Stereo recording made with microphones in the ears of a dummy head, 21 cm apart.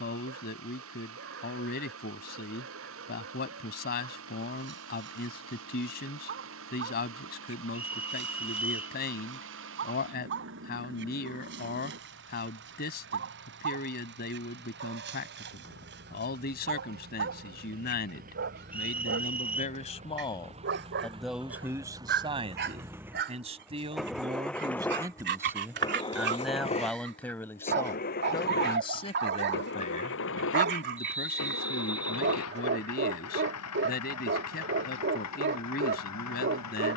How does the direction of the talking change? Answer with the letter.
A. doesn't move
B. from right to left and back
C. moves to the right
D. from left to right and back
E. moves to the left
D.